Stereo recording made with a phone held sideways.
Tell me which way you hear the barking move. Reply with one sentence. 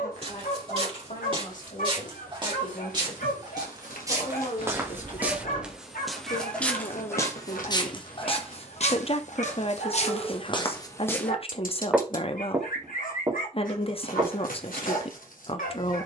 In this clip you hear the barking stay put.